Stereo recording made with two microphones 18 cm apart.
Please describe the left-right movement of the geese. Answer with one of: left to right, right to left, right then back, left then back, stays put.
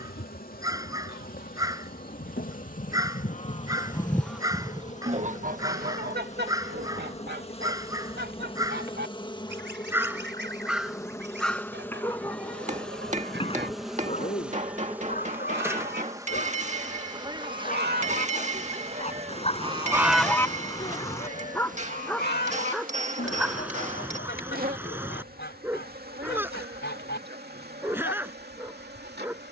right then back.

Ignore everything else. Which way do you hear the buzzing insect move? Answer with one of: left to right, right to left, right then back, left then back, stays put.
left to right.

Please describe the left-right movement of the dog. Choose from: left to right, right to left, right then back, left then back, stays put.
left then back.